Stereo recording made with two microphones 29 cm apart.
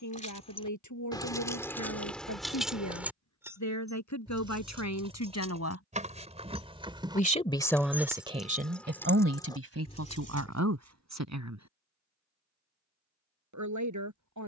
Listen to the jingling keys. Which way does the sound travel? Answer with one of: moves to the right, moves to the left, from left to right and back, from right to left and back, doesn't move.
from left to right and back.